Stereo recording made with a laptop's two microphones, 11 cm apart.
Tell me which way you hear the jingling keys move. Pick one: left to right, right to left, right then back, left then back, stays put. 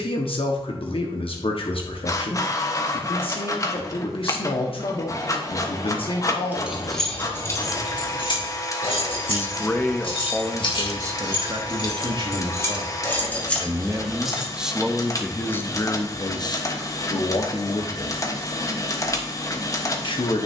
left then back.